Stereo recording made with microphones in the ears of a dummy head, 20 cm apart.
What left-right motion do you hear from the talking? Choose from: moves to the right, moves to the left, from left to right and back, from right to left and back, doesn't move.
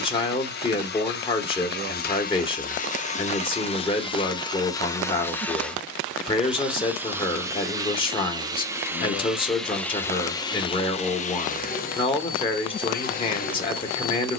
doesn't move.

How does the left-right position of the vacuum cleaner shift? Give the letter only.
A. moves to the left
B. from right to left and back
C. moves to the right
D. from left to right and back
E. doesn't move
D.